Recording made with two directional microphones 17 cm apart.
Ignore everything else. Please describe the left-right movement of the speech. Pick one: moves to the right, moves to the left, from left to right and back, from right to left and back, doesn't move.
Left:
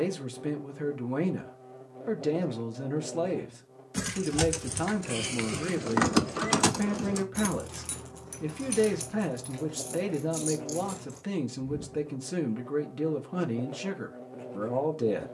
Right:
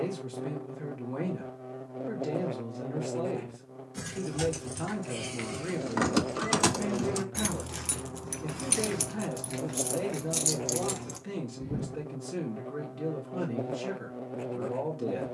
doesn't move.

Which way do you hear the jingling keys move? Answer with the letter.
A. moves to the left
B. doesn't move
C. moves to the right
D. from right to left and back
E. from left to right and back
C.